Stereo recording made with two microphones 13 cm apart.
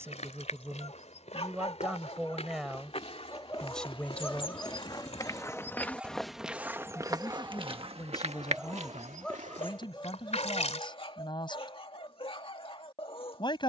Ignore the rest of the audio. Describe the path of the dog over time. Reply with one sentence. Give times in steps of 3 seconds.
In this clip you hear the dog on the left from 0 s, in the centre from 3 s and on the left from 9 s.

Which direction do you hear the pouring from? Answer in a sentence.
You can hear the pouring on the left.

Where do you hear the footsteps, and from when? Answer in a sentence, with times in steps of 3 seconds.
You can hear the footsteps on the left from 0 s, on the right from 6 s and not at all from 12 s.